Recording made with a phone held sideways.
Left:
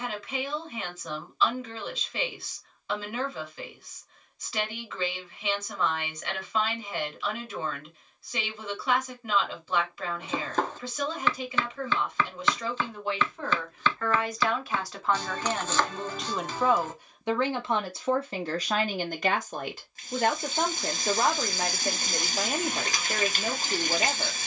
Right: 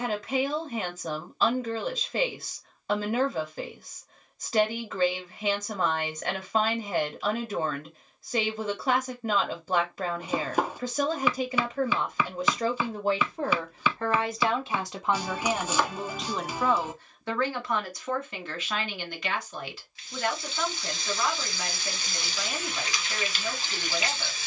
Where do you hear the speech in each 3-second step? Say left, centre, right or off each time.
right, right, right, right, right, centre, left, left.